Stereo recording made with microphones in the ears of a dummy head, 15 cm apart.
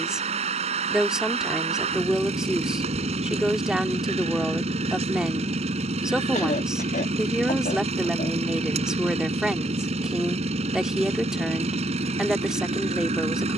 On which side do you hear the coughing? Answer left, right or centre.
left.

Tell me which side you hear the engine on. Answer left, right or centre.
right.